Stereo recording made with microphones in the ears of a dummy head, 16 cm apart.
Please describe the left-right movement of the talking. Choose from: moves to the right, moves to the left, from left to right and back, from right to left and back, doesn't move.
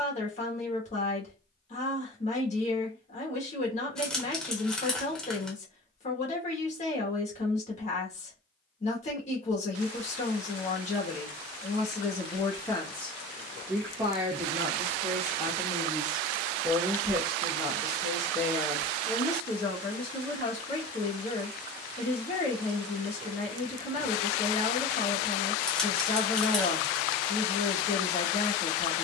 from left to right and back.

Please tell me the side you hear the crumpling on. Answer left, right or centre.
centre.